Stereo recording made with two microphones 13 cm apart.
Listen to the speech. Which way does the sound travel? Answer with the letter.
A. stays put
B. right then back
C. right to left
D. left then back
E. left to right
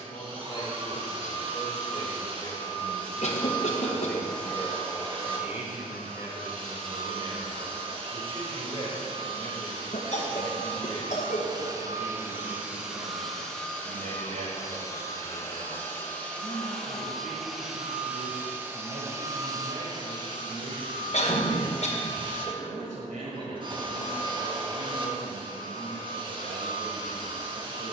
E.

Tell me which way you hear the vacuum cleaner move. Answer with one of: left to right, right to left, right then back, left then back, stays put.
left then back.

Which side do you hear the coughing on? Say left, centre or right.
left.